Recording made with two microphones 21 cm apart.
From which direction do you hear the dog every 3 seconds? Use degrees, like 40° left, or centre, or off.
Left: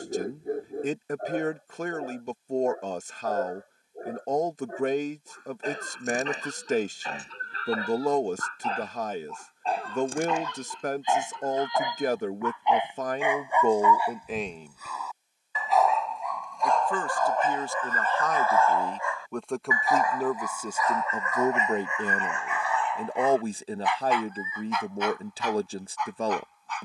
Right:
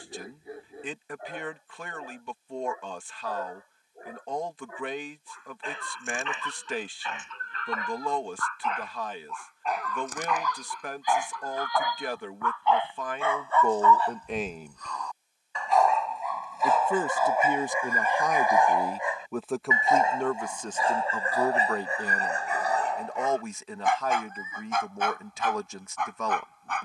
50° left, 40° left, 40° left, 30° left, 10° left, centre, 20° right, 40° right, 50° right.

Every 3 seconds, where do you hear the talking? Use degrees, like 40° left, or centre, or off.
40° left, 40° left, 40° left, 40° left, 20° left, 20° right, centre, 30° left, 30° left.